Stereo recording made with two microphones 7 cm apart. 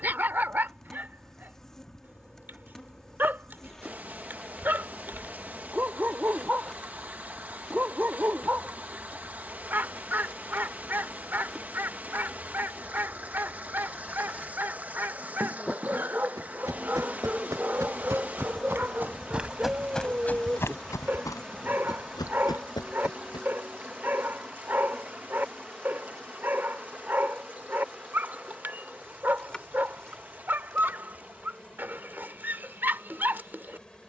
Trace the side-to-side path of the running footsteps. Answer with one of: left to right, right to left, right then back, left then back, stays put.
right to left.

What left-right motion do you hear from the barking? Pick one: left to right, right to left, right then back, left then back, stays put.
stays put.